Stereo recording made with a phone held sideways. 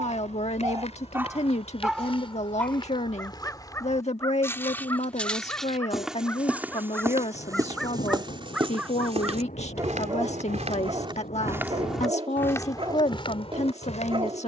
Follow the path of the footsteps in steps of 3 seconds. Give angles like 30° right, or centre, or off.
40° left, 10° left, 20° right, 30° right, 30° left.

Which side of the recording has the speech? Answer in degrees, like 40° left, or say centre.
40° left.